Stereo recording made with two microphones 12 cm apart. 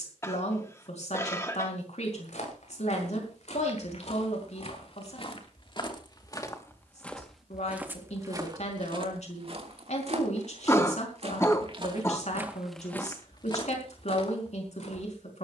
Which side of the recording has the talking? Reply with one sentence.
In this clip you hear the talking on the left.